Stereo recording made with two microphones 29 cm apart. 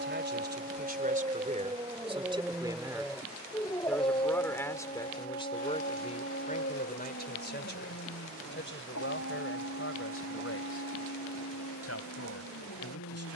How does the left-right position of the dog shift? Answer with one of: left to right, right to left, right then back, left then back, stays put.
right to left.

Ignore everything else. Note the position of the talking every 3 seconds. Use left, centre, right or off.
right, centre, left, left, left.